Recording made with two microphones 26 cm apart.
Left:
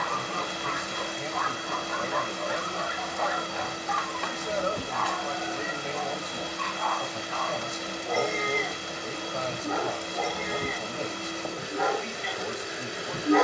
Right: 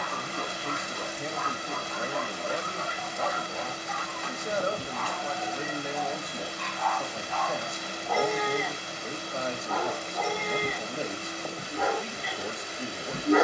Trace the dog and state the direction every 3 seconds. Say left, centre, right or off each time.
left, left, left, centre, centre.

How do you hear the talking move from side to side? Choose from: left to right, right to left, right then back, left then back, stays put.
stays put.